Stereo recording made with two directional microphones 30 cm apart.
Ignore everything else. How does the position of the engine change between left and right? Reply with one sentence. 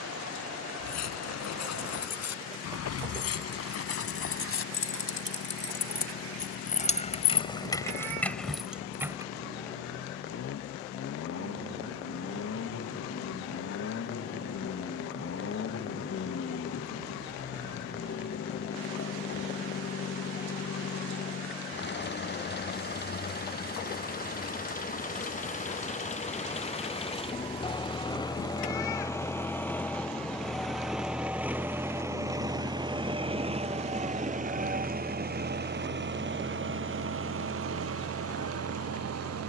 You can hear the engine travel towards the right.